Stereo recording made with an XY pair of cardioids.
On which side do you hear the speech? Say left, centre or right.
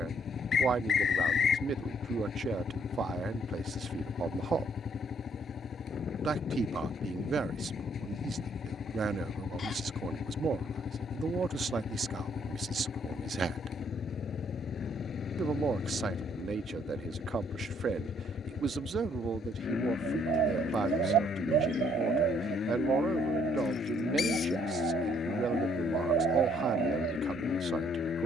right.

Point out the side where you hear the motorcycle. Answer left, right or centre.
left.